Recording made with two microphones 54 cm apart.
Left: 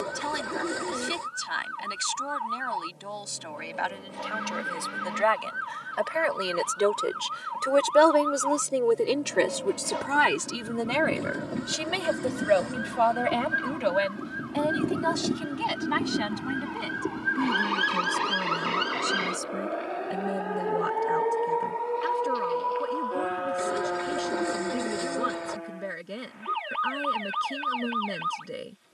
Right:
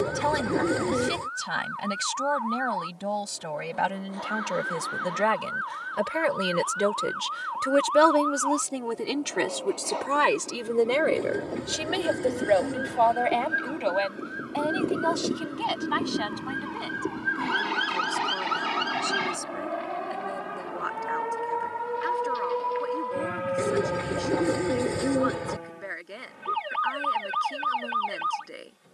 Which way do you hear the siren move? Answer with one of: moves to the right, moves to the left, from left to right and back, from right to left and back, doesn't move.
moves to the right.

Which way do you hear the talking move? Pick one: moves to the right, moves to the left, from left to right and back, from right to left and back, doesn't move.
moves to the left.